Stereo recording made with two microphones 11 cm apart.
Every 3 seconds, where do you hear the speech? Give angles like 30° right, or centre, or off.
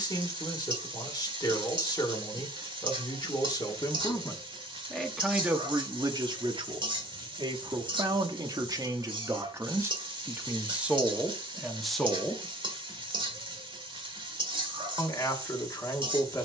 40° left, 10° left, 40° right, 20° right, 10° left, 30° left.